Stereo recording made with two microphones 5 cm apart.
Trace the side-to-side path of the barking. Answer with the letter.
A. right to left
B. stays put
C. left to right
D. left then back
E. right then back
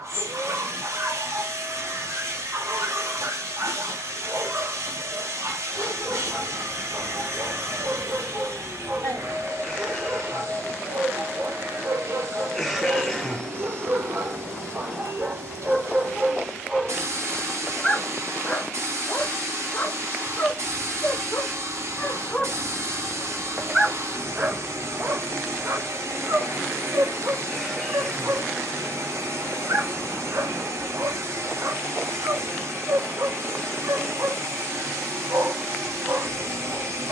D.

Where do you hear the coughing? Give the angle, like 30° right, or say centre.
centre.